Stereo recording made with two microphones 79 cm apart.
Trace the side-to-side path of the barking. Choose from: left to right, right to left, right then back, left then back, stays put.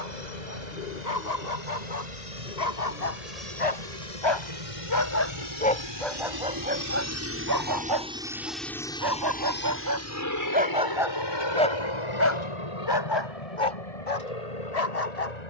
right then back.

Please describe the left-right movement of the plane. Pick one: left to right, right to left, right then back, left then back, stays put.
right to left.